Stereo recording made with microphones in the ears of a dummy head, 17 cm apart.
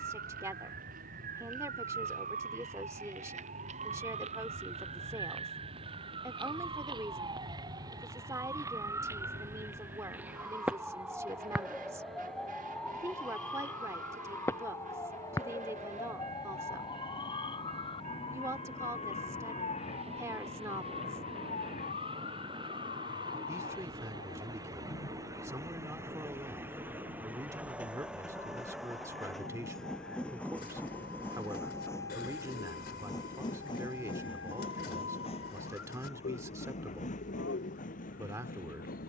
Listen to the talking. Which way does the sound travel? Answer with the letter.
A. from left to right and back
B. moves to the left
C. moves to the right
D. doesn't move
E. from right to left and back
D.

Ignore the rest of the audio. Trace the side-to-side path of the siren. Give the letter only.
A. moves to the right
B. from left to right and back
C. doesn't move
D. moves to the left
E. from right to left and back
D.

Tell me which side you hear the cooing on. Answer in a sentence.
In this clip you hear the cooing on the left.